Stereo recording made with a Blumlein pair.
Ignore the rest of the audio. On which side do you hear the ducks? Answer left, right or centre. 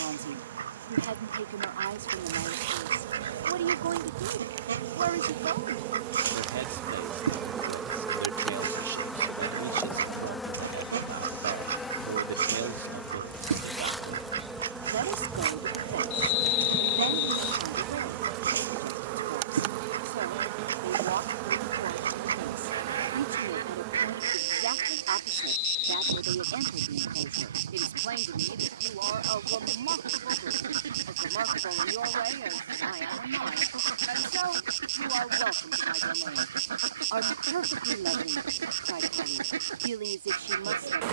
right.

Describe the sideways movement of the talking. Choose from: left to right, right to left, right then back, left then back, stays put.
stays put.